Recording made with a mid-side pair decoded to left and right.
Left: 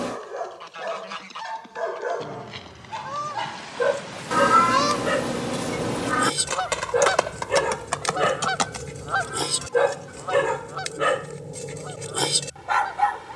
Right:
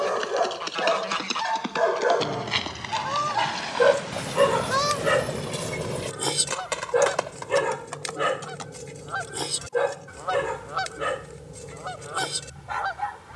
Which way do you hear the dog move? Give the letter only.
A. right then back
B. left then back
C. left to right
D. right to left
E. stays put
D.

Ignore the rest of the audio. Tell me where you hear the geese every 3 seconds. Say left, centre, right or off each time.
right, centre, left, centre, right.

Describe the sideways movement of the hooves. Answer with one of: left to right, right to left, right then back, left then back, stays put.
right to left.